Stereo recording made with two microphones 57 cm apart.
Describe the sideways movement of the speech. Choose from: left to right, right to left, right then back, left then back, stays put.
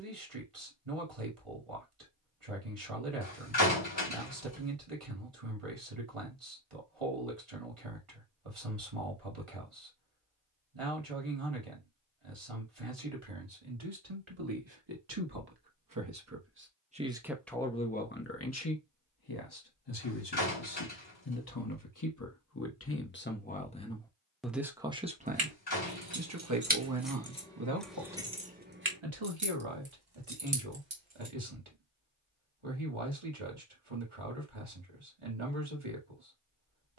left then back.